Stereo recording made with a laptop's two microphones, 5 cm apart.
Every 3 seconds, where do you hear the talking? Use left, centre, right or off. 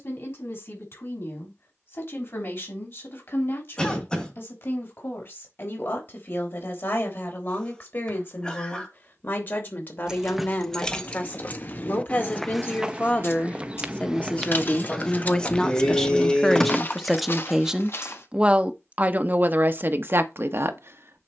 left, left, left, left, left, centre, right.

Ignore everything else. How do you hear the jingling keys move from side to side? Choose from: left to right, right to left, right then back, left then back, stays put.
left then back.